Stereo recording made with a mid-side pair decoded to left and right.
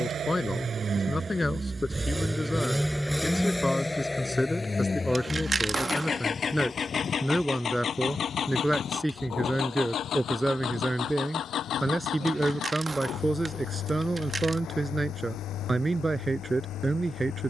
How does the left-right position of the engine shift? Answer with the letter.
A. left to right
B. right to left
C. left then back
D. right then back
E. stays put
B.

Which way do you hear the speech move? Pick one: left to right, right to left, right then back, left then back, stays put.
left to right.